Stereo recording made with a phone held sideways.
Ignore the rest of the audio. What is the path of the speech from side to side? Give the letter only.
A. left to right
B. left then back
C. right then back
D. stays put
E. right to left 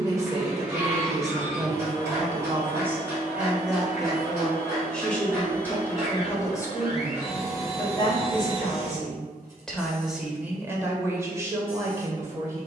B.